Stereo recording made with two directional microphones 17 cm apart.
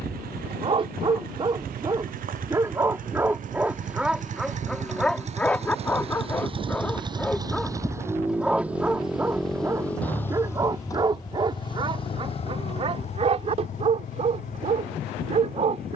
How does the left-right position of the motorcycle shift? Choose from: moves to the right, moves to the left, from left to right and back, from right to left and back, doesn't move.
moves to the left.